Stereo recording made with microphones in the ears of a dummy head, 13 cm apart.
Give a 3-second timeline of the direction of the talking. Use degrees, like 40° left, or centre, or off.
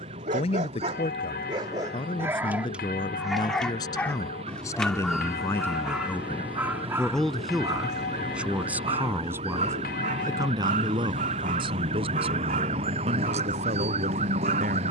40° left, 20° left, centre, 30° right, 50° right.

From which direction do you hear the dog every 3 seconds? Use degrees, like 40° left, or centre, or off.
30° right, centre, 20° right, 50° right, 60° right.